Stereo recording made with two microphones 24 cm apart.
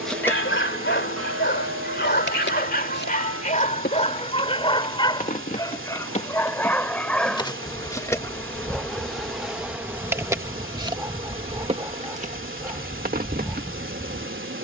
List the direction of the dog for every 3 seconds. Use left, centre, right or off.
left, left, centre, centre, centre.